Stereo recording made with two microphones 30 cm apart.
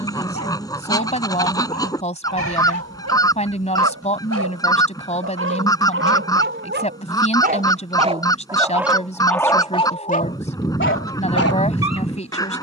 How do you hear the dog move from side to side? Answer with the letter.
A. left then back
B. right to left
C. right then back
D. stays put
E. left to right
B.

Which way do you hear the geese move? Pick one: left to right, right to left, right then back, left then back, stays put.
stays put.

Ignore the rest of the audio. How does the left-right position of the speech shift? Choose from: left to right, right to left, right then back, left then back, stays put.
stays put.